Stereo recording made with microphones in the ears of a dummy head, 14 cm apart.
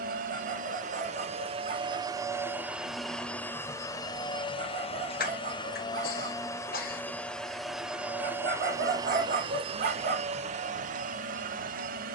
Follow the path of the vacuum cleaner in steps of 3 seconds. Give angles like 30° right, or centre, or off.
30° right, 20° left, centre, 40° right.